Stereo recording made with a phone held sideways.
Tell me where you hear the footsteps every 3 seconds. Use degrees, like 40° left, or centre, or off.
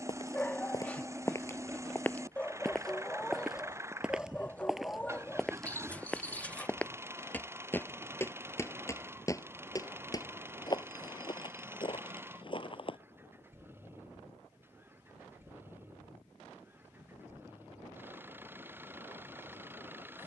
20° left, centre, 10° left, 30° left, 40° left, off, off.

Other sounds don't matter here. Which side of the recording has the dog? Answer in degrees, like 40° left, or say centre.
10° left.